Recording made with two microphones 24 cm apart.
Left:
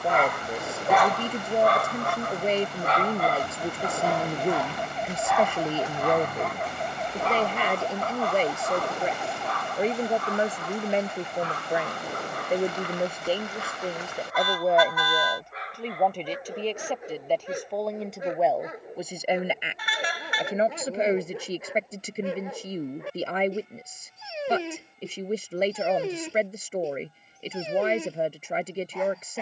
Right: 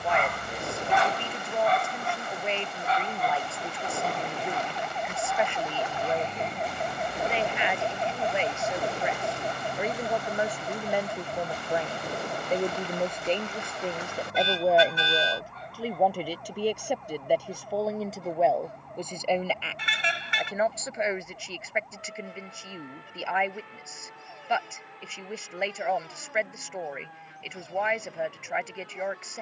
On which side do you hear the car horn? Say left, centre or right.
right.